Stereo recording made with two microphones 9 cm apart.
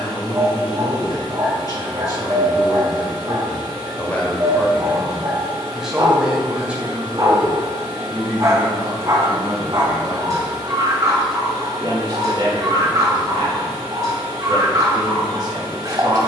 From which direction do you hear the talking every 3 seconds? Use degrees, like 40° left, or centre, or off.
40° left, 10° left, 20° right, 30° right, 40° right, 40° right.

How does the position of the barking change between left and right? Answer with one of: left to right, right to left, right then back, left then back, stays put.
stays put.